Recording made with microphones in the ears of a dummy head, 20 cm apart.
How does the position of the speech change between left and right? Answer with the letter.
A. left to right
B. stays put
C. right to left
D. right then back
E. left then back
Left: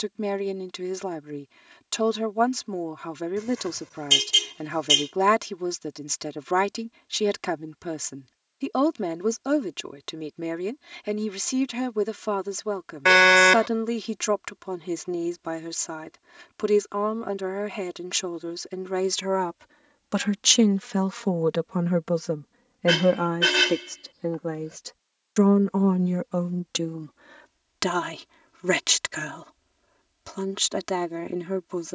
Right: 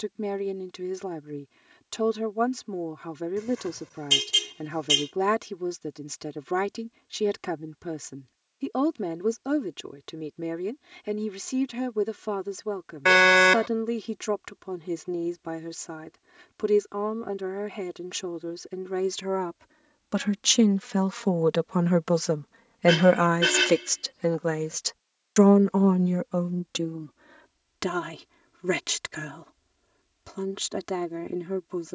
D.